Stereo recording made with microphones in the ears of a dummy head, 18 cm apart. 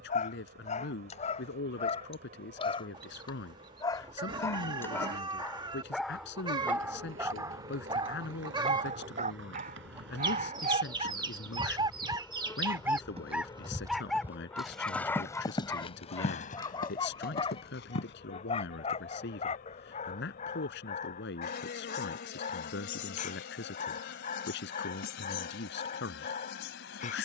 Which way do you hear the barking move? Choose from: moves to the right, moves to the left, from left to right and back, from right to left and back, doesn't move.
from left to right and back.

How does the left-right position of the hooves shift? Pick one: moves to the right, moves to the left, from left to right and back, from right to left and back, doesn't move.
moves to the left.